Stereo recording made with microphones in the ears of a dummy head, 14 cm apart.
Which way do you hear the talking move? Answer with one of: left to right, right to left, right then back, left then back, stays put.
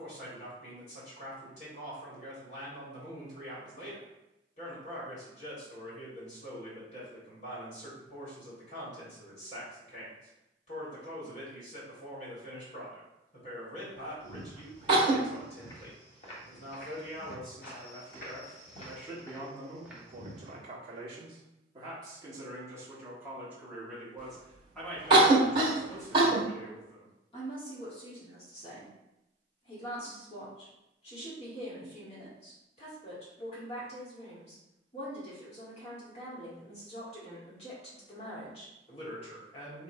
right then back.